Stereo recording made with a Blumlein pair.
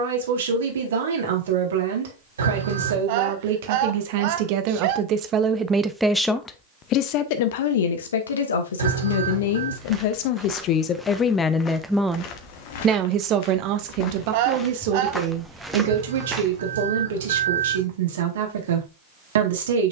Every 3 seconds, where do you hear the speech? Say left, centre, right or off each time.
right, right, left, left, right, right, right.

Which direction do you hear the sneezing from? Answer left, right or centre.
right.